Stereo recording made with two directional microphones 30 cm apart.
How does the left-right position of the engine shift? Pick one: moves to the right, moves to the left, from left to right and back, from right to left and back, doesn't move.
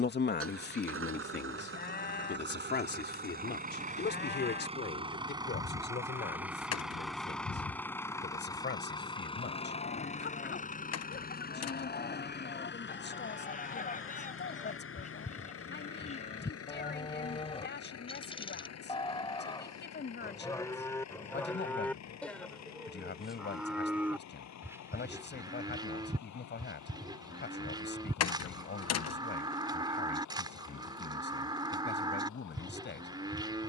moves to the left.